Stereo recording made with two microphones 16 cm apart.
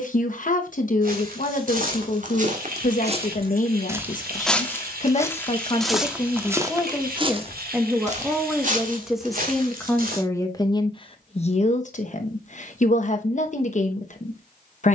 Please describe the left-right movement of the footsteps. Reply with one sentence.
You can hear the footsteps move from right to left and back again.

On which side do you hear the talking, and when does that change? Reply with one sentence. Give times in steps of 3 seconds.
You can hear the talking on the left from 0 s, in the centre from 6 s and on the left from 9 s.